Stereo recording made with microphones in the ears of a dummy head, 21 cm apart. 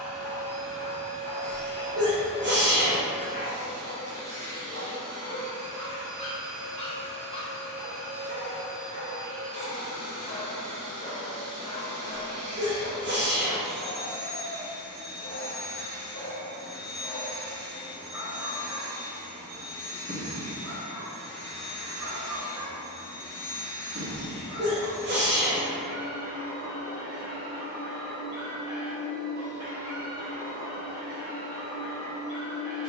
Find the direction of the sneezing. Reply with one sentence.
In this clip you hear the sneezing on the right.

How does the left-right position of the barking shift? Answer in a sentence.
You can hear the barking go from the left side to the right.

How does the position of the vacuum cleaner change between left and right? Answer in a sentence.
In this clip you hear the vacuum cleaner stay put.